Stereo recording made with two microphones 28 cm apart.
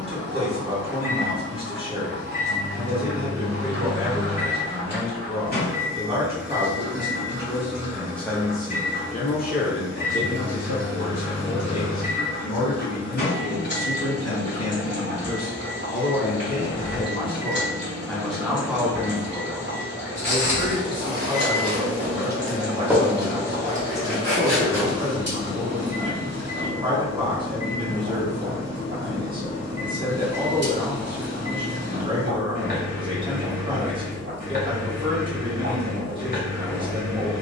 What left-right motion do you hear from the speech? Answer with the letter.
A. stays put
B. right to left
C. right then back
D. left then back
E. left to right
D.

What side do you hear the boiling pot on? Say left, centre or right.
right.